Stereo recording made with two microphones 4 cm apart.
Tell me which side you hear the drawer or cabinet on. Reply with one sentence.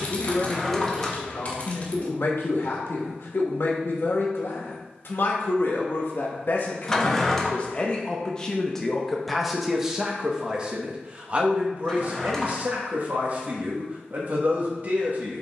You can hear the drawer or cabinet in the centre.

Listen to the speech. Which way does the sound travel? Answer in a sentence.
In this clip you hear the speech travel towards the right.